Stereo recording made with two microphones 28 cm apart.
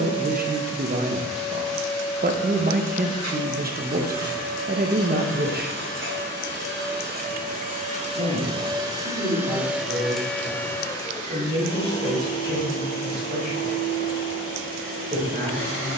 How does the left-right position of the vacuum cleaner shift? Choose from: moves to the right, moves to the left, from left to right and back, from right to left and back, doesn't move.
moves to the left.